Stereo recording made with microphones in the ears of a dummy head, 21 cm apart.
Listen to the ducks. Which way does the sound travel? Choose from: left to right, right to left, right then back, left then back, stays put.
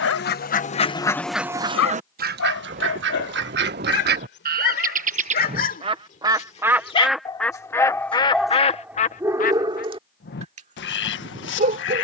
right then back.